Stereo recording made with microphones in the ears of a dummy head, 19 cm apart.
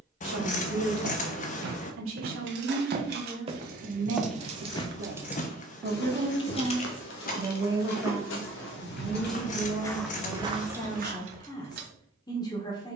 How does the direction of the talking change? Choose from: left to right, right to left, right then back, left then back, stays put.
right to left.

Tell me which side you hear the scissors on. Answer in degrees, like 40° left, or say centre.
40° left.